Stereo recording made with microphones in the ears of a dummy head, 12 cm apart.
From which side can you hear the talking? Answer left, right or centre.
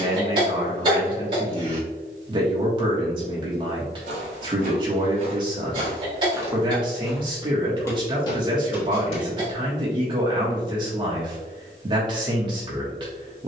right.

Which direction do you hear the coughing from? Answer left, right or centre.
right.